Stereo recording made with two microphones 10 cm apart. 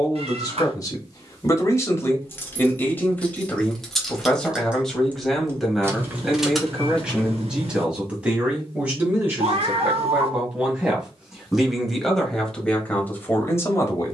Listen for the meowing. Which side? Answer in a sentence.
You can hear the meowing on the right.